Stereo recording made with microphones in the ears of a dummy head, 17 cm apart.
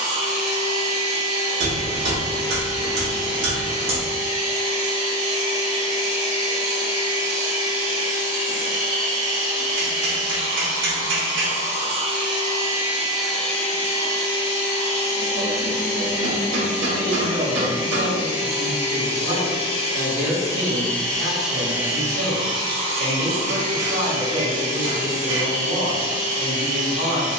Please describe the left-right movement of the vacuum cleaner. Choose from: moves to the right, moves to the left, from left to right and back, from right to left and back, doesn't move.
from right to left and back.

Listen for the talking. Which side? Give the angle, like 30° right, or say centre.
60° right.